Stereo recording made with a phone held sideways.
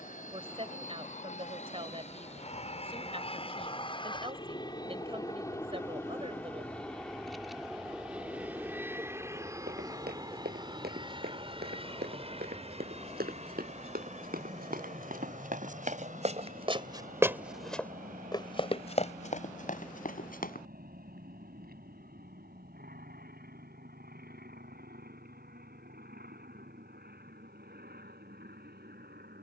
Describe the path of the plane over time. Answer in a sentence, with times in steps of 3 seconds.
You can hear the plane on the left from 0 s, in the centre from 6 s and on the right from 9 s.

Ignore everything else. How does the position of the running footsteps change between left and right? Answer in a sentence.
In this clip you hear the running footsteps move from right to left.